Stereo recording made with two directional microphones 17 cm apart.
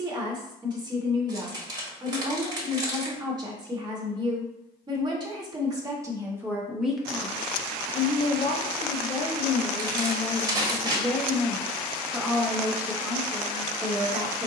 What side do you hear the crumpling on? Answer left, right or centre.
right.